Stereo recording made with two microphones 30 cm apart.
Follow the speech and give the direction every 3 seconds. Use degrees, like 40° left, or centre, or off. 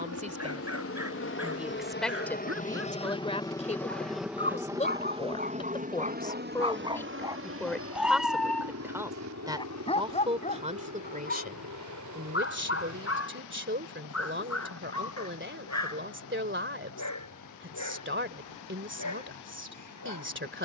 centre, 20° left, centre, 20° right, 40° right, 40° right, 40° right.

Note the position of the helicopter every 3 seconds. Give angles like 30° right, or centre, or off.
40° left, 10° right, 40° right, 60° right, 60° right, 70° right, 70° right.